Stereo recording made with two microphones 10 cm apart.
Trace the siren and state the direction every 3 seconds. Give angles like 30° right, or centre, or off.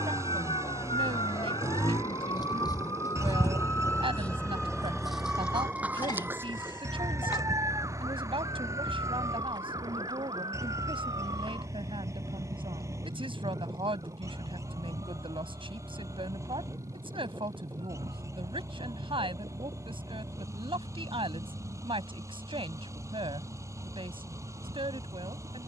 60° left, 10° left, 30° right, 50° right, 60° right, 60° right, 60° right, 60° right, 70° right.